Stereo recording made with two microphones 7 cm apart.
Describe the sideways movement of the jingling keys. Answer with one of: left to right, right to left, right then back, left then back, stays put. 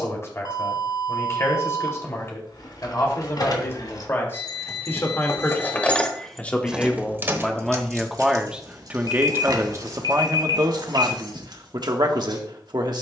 left to right.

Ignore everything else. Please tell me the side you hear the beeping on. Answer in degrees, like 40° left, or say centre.
60° left.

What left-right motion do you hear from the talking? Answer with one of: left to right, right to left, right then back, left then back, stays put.
left to right.